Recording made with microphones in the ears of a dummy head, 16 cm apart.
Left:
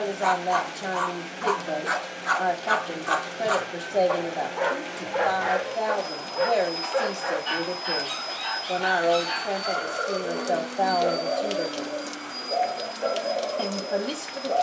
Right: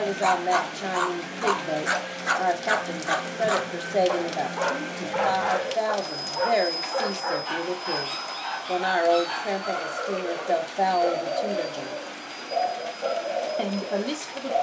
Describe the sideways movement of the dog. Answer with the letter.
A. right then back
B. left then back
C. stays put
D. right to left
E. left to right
D.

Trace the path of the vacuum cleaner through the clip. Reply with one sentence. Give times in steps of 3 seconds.
In this clip you hear the vacuum cleaner on the right from 0 s, in the centre from 6 s and on the left from 9 s.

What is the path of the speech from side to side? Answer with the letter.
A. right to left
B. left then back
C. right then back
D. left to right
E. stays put
E.